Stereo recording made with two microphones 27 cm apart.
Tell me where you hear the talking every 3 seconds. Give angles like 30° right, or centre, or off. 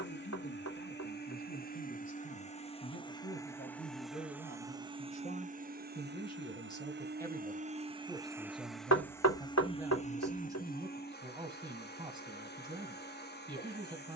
50° left, 30° left, 10° left, 10° right, 20° right.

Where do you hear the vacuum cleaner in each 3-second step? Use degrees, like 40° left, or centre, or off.
30° left, 10° right, 30° right, 30° left, 40° left.